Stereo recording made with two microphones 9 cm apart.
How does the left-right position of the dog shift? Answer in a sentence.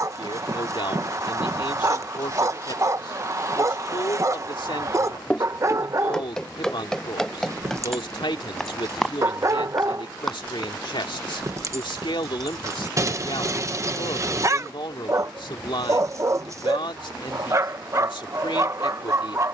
In this clip you hear the dog stay put.